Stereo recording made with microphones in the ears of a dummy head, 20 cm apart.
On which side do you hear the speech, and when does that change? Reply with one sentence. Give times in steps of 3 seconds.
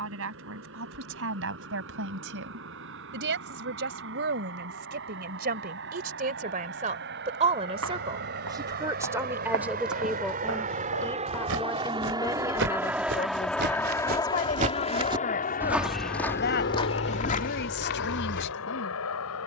In this clip you hear the speech on the right from 0 s, in the centre from 9 s and on the left from 12 s.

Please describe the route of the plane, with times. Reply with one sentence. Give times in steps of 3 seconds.
In this clip you hear the plane on the right from 0 s, in the centre from 12 s and on the left from 15 s.